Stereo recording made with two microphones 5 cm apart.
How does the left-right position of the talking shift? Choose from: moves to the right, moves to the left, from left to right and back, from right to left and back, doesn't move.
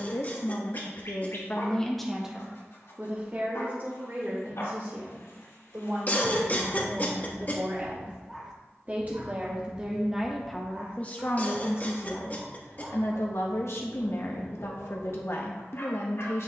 from left to right and back.